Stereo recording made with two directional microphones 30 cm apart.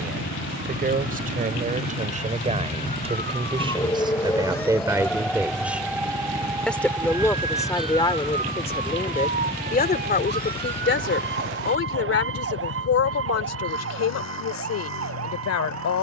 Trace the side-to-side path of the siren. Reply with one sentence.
You can hear the siren go from the left side to the right.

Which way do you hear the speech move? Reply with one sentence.
You can hear the speech go from the right side to the left.